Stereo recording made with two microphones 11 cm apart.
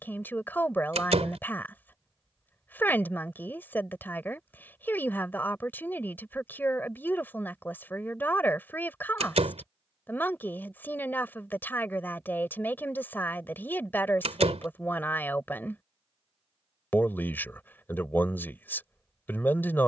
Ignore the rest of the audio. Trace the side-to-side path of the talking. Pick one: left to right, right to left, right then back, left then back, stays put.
stays put.